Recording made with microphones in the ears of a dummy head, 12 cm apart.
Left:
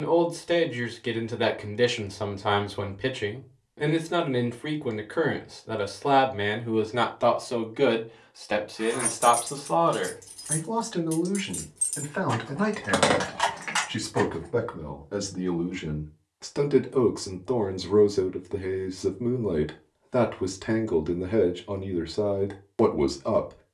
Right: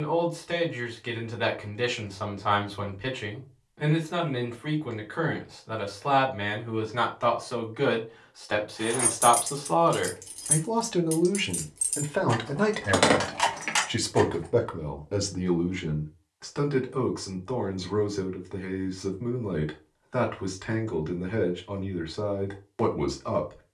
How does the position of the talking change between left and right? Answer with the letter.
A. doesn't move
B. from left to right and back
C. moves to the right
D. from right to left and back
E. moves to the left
B.